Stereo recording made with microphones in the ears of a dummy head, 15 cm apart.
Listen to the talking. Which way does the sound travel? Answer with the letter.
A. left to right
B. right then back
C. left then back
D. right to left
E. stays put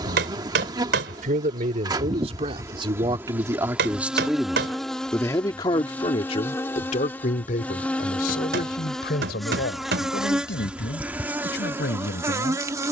D.